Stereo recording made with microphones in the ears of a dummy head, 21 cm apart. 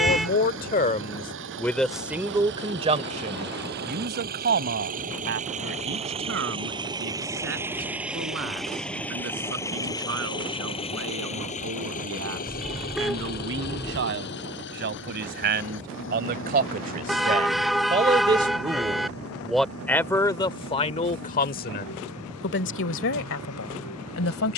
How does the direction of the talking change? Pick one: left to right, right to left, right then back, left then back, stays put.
right then back.